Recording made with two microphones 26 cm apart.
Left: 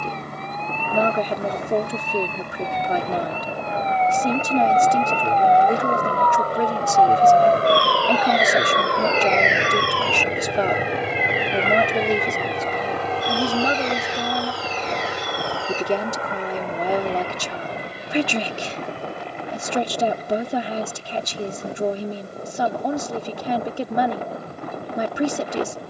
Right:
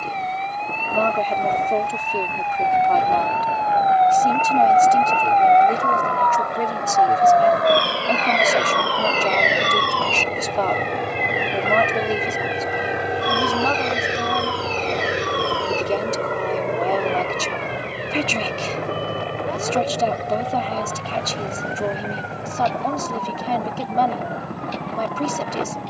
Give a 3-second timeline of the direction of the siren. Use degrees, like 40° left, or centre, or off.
50° left, 20° left, 20° right, 50° right, 60° right, 70° right, 70° right, 80° right, 80° right.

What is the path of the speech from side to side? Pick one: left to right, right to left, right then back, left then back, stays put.
stays put.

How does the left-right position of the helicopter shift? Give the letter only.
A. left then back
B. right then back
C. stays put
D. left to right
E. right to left
D.